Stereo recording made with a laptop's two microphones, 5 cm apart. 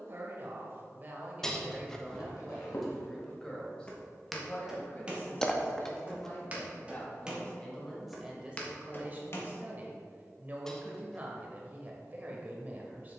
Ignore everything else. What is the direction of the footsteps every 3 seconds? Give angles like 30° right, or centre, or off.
60° left, centre, 10° right, 50° left, off.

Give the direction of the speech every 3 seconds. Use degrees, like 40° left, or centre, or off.
20° right, 30° left, 10° left, 30° right, 30° right.